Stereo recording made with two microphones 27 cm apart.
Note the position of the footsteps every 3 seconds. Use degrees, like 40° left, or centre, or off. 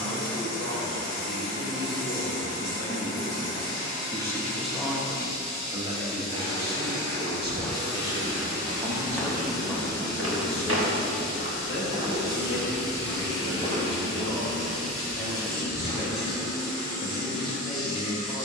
off, off, 20° left, 30° right, 10° left, 30° left.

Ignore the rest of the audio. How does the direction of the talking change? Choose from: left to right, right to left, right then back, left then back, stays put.
right then back.